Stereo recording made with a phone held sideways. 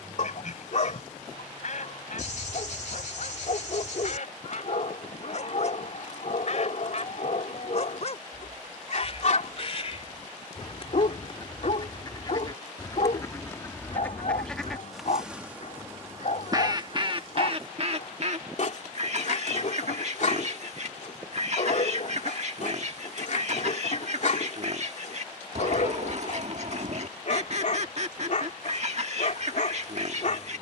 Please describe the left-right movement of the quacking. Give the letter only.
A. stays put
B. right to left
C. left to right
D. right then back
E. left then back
C.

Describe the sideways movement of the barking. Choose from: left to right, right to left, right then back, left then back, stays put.
stays put.